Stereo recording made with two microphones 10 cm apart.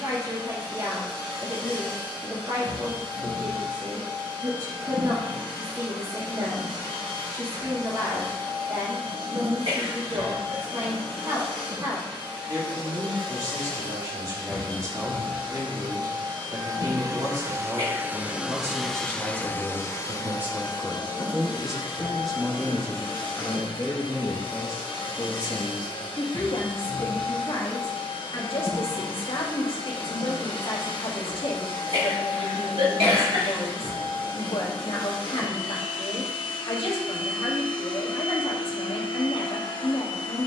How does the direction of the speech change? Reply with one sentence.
You can hear the speech travel towards the left.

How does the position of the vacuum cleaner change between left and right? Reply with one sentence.
You can hear the vacuum cleaner go from the right side to the left.